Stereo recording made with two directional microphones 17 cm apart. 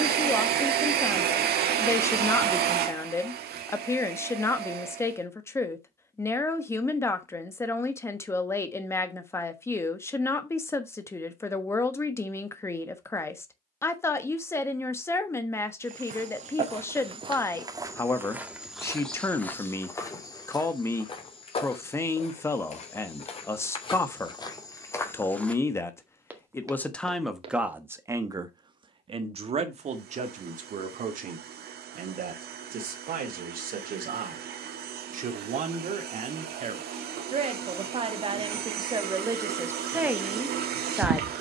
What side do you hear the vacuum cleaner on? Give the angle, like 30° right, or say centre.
70° right.